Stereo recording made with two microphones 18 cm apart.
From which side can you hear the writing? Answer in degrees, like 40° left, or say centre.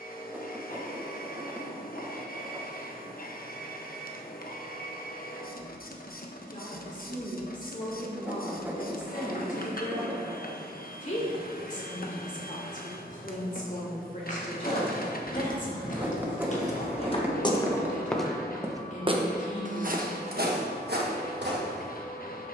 10° right.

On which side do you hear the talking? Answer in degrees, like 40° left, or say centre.
50° left.